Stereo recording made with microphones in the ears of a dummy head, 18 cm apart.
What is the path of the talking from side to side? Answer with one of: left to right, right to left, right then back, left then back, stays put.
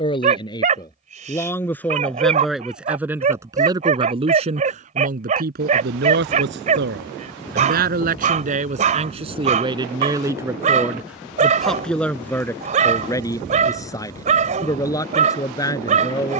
right then back.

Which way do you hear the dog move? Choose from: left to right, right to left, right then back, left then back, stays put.
stays put.